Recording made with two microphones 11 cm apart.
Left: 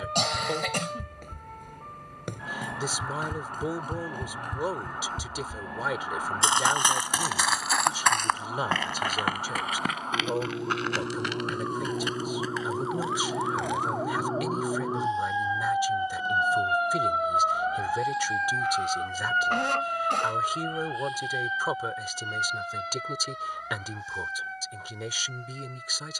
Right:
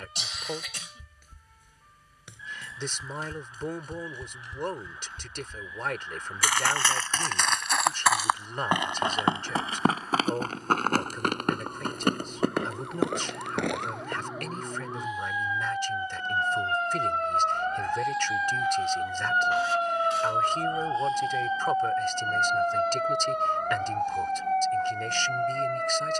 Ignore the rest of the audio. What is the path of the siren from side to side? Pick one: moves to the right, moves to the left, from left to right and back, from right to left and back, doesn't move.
moves to the right.